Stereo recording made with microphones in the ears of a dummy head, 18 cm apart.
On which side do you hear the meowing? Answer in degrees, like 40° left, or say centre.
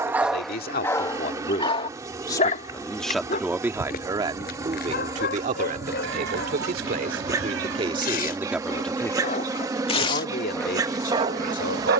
80° right.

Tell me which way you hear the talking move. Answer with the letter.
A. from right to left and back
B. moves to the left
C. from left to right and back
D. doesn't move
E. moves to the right
C.